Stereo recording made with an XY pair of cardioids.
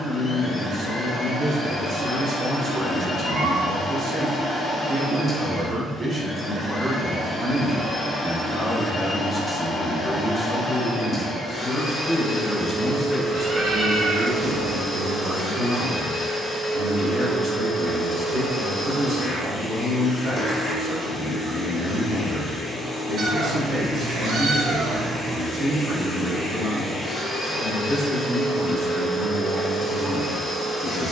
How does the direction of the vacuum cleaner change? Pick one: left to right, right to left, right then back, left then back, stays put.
stays put.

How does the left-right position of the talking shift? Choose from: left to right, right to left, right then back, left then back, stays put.
left then back.